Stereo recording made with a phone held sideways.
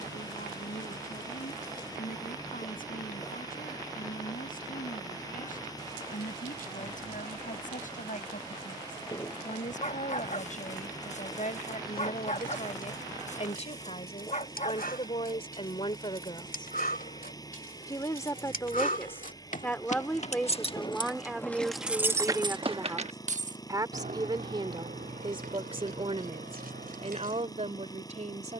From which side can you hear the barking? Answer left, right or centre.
left.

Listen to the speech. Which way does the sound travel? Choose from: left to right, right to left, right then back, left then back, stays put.
left to right.